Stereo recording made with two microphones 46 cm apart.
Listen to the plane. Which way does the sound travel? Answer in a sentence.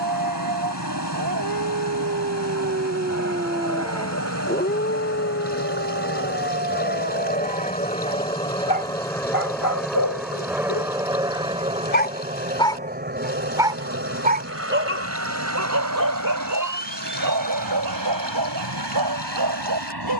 In this clip you hear the plane move to the right.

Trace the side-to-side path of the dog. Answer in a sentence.
In this clip you hear the dog go left and come back.